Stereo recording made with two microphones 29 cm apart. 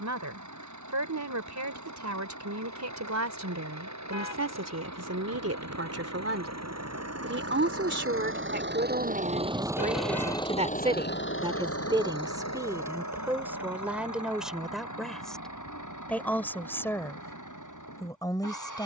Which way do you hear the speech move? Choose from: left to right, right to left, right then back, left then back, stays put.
right to left.